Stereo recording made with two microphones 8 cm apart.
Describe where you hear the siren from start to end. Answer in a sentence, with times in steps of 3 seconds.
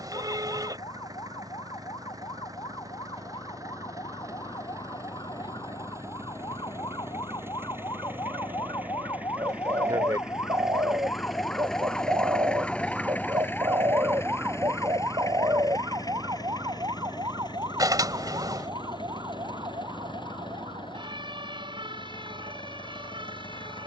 You can hear the siren on the left from 0 s, in the centre from 12 s and on the right from 15 s.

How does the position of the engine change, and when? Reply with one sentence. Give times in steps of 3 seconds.
You can hear the engine on the right from 0 s, in the centre from 9 s and on the left from 12 s.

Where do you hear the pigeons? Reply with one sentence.
In this clip you hear the pigeons on the right.